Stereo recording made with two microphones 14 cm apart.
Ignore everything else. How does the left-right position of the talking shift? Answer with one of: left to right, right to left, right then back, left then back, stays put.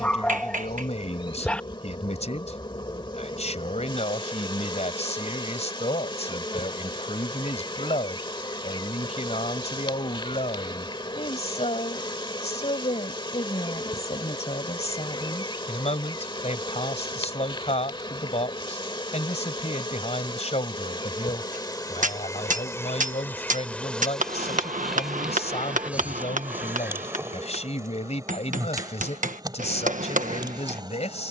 stays put.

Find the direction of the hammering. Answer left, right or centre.
right.